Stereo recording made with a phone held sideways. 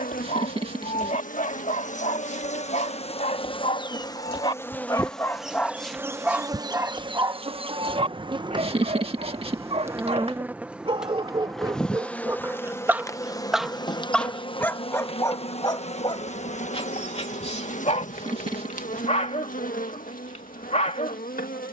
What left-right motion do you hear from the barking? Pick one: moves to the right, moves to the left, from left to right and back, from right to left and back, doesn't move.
from left to right and back.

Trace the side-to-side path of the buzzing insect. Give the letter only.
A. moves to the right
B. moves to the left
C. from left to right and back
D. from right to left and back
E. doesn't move
C.